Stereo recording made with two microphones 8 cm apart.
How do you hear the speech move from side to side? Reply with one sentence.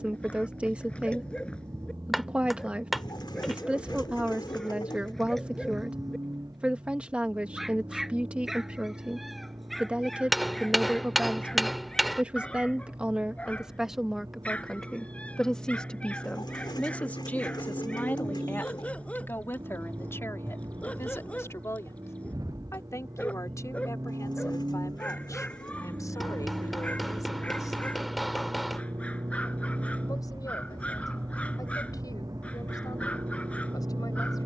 In this clip you hear the speech go from the right side to the left.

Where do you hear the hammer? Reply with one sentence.
In this clip you hear the hammer in the centre.